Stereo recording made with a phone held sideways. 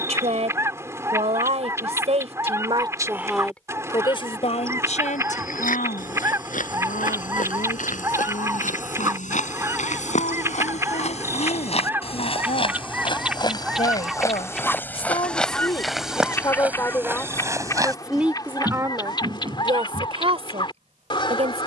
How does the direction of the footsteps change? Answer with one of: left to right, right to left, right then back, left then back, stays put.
left to right.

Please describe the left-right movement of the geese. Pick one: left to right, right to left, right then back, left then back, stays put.
right to left.